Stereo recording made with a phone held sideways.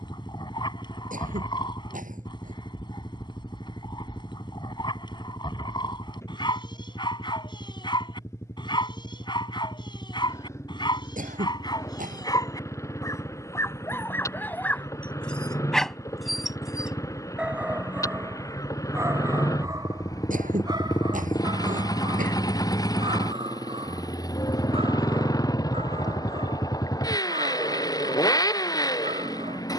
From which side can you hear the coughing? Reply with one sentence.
You can hear the coughing on the right.